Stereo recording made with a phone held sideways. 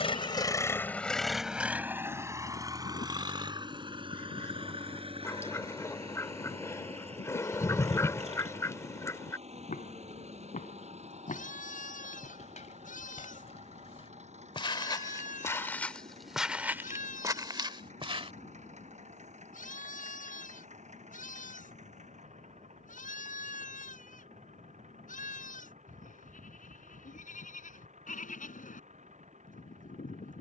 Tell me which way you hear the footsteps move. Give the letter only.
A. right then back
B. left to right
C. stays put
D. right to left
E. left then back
B.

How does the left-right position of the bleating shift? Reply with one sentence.
In this clip you hear the bleating stay in one place.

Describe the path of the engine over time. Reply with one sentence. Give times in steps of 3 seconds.
You can hear the engine in the centre from 0 s and on the right from 3 s.